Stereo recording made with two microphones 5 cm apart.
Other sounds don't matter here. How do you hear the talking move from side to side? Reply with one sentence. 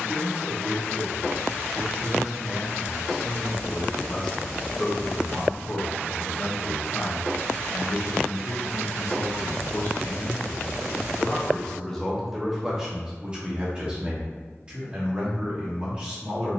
You can hear the talking move from right to left and back again.